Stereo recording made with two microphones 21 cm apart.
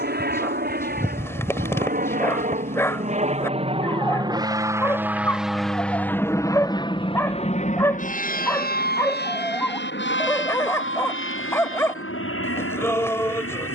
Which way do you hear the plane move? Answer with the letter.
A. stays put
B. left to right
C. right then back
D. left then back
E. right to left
E.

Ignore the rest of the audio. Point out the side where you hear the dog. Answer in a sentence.
In this clip you hear the dog in the centre.